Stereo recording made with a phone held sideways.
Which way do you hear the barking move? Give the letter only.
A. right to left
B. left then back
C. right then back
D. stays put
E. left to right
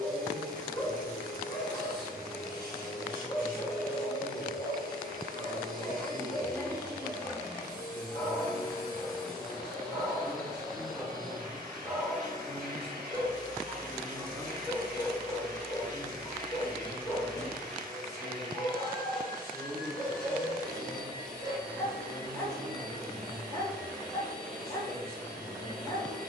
C.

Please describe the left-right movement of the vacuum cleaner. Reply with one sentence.
In this clip you hear the vacuum cleaner stay in one place.